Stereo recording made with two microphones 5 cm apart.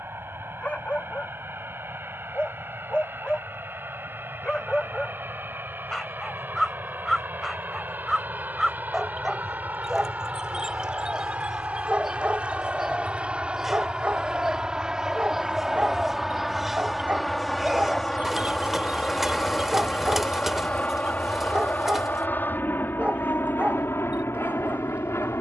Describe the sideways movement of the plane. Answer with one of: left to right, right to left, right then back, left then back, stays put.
right to left.